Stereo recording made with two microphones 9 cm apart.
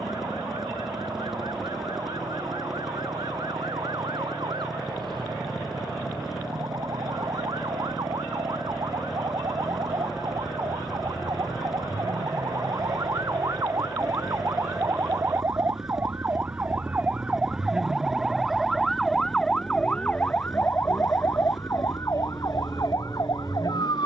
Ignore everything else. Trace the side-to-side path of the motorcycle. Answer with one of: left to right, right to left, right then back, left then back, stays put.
stays put.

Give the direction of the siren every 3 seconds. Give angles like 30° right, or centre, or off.
60° right, 60° right, 60° right, 50° right, 40° right, 20° right, 10° left, 40° left.